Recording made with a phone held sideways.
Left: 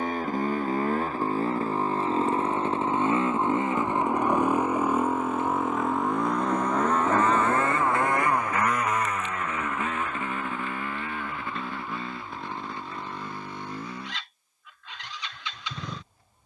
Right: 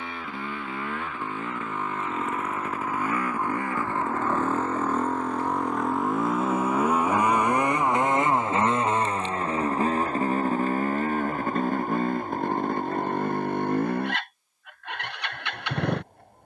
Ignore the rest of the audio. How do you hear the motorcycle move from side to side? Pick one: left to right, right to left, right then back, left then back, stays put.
left to right.